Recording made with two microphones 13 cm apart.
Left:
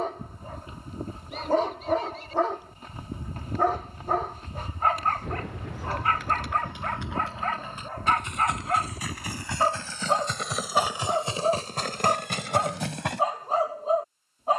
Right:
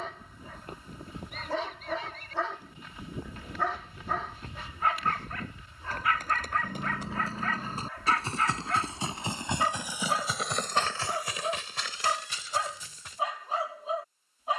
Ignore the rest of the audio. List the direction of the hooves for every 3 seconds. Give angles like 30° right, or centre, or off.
50° right, 50° right, 40° right, 10° left, 70° left.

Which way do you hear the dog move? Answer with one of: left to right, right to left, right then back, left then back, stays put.
stays put.